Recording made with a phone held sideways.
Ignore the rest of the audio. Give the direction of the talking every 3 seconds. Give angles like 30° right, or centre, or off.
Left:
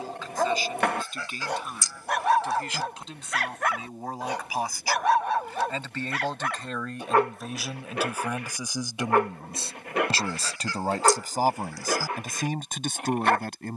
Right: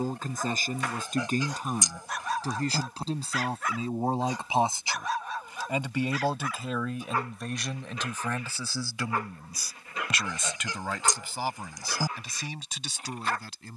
40° right, 30° right, centre, 40° left, 50° left.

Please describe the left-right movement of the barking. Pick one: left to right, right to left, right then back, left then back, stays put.
stays put.